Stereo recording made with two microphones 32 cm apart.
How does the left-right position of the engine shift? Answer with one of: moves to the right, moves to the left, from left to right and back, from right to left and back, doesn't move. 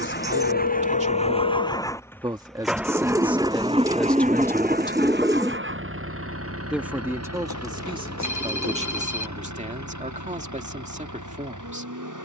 moves to the right.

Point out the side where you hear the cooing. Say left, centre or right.
centre.